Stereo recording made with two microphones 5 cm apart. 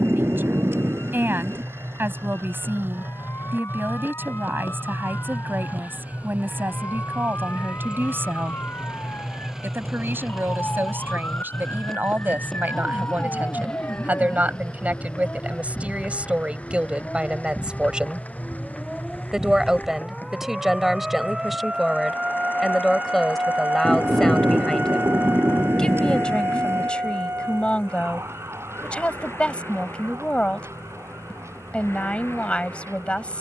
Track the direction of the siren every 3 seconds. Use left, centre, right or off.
left, left, left, left, left, left, centre, right, right, right, right.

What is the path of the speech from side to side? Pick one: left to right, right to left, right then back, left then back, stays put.
right to left.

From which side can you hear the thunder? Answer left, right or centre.
right.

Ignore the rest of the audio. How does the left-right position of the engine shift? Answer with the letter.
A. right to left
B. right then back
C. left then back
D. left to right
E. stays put
A.